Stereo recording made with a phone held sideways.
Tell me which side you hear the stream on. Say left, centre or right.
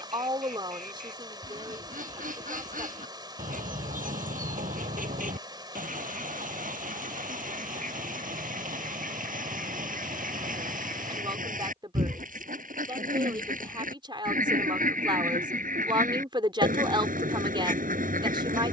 right.